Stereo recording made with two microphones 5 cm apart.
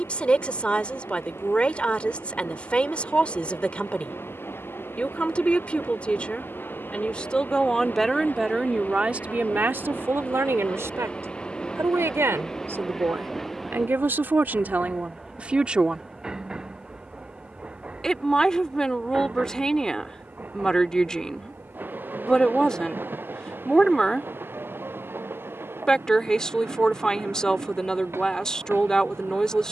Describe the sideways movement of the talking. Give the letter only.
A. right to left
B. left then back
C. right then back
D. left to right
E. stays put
C.